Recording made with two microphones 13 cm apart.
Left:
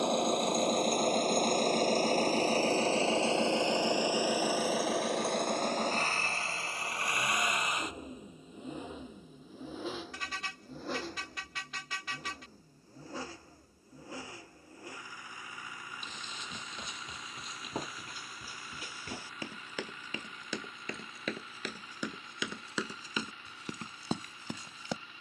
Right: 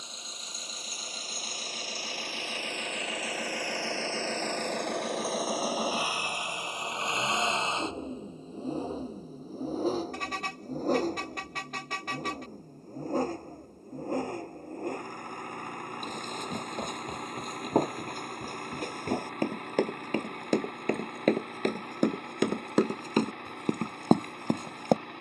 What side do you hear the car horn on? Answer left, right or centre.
right.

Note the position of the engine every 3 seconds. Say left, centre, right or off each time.
left, centre, right, right, right, right, right, right, right.